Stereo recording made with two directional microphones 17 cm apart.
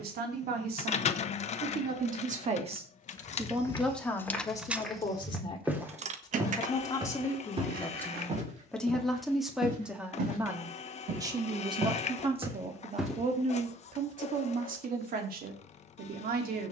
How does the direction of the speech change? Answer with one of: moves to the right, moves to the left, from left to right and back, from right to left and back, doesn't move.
from right to left and back.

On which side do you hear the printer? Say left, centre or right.
left.